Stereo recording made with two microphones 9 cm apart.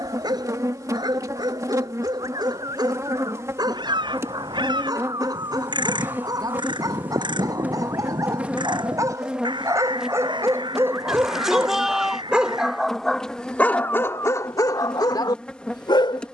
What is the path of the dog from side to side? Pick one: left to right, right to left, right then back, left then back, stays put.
right to left.